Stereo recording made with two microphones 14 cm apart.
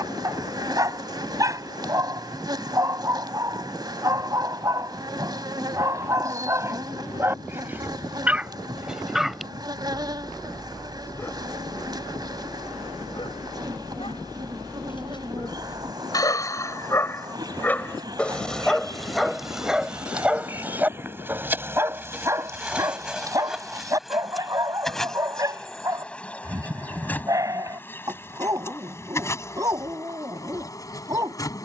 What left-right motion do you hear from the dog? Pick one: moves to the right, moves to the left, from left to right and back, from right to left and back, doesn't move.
from right to left and back.